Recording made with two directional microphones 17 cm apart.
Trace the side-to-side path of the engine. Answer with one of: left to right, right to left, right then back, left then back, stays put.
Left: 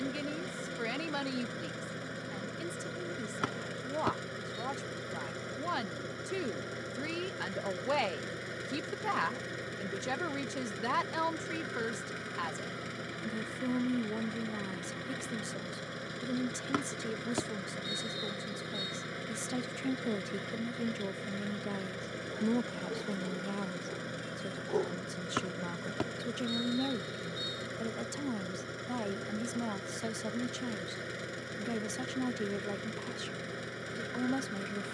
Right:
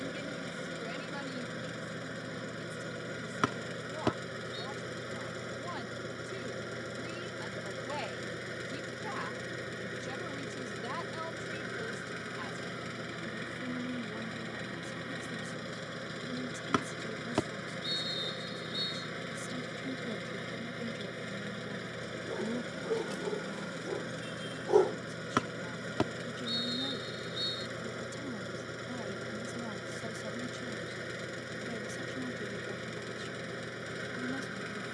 stays put.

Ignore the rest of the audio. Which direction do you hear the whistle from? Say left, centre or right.
right.